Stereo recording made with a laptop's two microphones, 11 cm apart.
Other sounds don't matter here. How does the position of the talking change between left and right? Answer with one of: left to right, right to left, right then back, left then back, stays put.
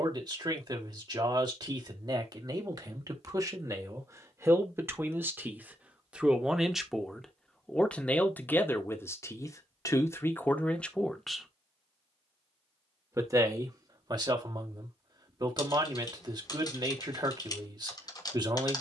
left then back.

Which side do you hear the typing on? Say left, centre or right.
left.